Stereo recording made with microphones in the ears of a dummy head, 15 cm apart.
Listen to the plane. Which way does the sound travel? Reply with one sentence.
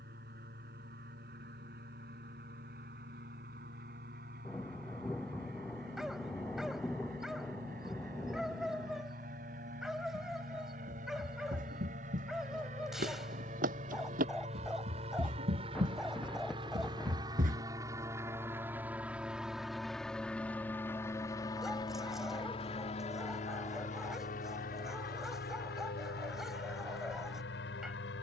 You can hear the plane move from right to left.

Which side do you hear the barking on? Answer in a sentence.
You can hear the barking in the centre.